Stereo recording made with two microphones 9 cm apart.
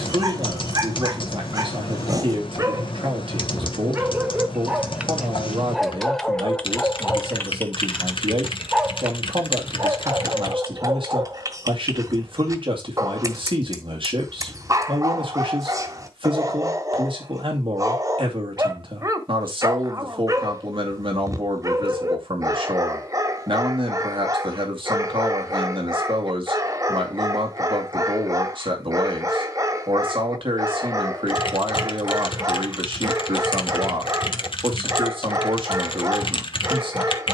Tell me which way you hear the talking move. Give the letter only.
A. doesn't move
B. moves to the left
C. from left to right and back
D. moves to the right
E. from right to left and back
A.